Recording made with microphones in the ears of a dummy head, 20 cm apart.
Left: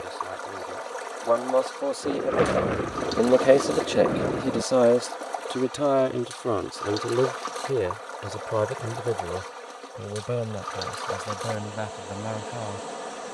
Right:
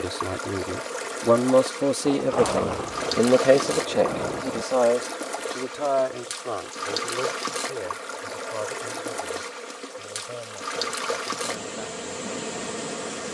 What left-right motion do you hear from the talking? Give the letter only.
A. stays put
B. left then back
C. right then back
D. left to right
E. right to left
E.